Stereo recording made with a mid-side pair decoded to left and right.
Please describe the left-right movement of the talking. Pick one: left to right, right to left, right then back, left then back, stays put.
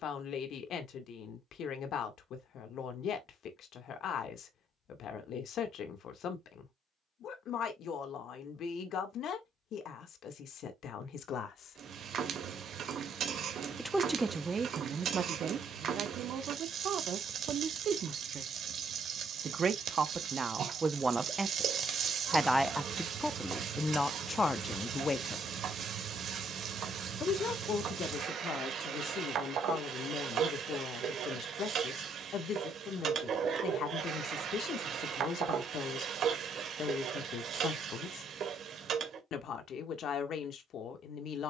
right then back.